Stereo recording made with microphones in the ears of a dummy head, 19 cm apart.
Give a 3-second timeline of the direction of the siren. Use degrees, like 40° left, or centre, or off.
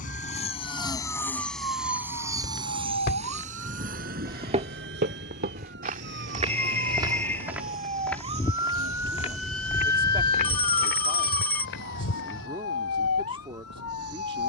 70° right, 60° right, 30° right, 20° left, 60° left.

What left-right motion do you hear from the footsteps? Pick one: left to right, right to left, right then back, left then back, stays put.
right then back.